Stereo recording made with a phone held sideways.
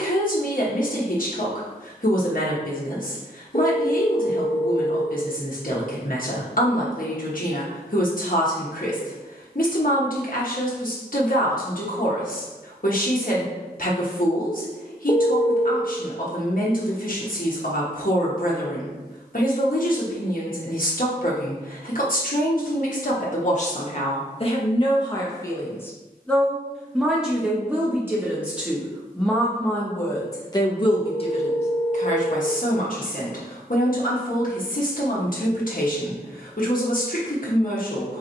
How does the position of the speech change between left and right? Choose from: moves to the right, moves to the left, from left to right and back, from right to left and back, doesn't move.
from left to right and back.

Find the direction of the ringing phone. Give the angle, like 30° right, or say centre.
30° left.